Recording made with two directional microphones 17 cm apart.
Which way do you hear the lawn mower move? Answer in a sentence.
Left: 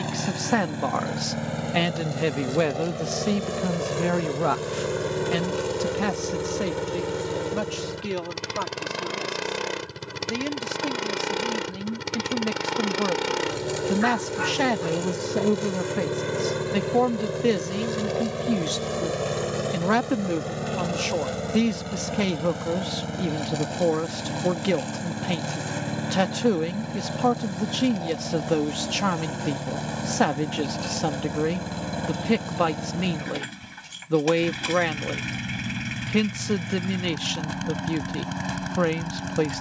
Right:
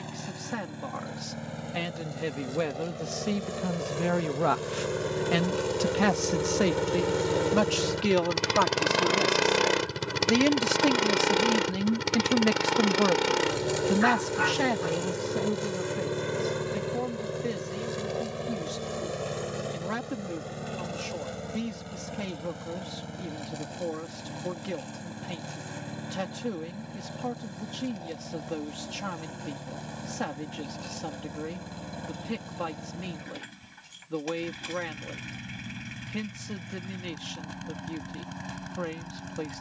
You can hear the lawn mower go right and come back.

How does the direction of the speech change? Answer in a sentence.
In this clip you hear the speech go right and come back.